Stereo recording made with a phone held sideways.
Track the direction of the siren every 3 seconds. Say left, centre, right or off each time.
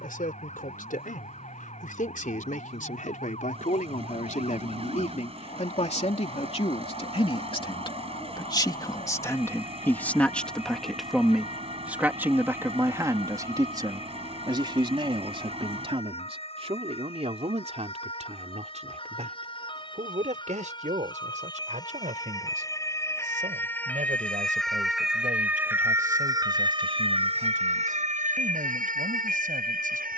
left, left, left, left, left, left, left, left, centre, right.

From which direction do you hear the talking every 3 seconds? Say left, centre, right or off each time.
left, left, left, centre, right, right, right, right, right, right.